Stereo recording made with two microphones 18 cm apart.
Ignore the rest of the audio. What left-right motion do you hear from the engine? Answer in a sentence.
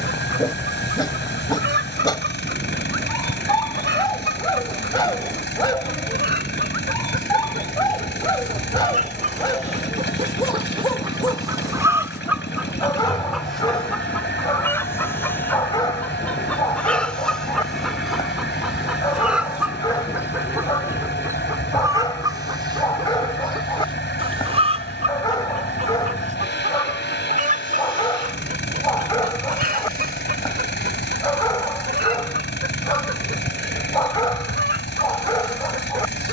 You can hear the engine stay put.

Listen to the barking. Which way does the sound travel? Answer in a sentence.
In this clip you hear the barking stay in one place.